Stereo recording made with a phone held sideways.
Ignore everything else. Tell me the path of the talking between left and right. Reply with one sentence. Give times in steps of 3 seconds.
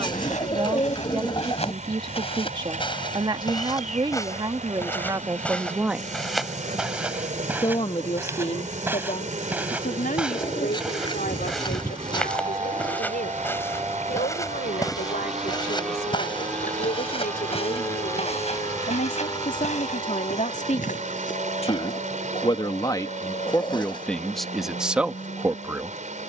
You can hear the talking on the right from 0 s, on the left from 6 s and in the centre from 24 s.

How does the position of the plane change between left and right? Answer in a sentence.
In this clip you hear the plane move from right to left.